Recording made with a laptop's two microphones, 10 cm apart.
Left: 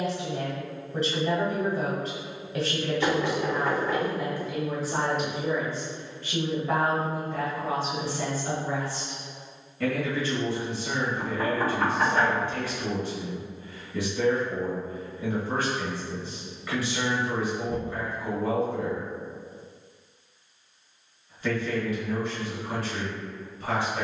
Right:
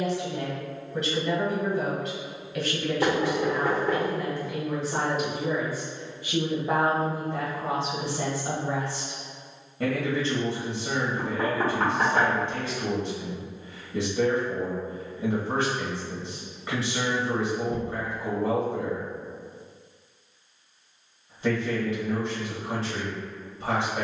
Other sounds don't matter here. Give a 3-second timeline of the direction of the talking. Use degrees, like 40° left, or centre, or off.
30° left, 10° left, 20° right, 30° right, 30° right, 30° right, 30° right, 30° right.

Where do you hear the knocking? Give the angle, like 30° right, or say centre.
50° right.